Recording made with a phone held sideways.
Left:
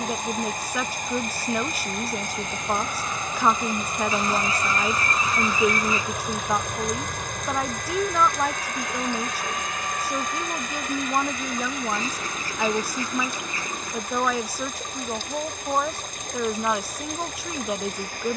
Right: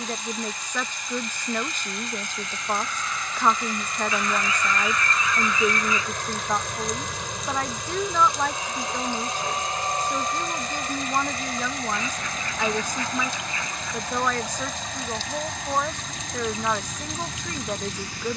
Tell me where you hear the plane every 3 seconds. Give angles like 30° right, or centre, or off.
40° left, 20° left, 10° right, 30° right, 50° right, 60° right.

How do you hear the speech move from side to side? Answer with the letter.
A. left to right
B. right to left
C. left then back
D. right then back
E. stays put
E.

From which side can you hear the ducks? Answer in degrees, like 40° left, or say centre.
30° left.